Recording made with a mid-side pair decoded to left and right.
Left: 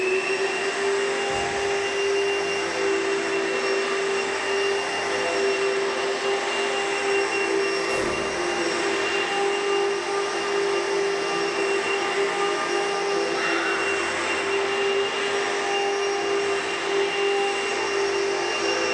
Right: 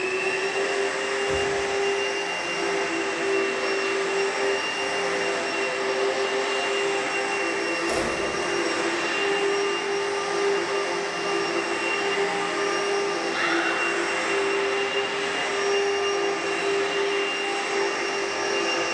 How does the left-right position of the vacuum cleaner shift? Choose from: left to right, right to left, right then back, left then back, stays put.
stays put.